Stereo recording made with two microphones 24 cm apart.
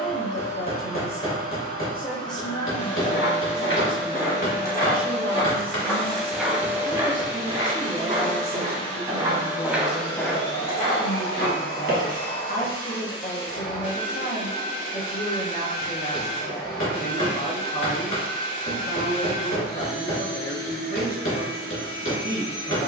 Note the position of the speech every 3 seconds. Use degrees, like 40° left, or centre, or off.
30° left, 10° right, 30° left, 40° left, 40° left, 40° left, 40° left, 40° left.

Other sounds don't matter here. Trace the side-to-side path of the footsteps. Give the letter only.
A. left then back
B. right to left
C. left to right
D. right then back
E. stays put
D.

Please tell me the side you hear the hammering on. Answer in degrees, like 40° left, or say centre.
60° left.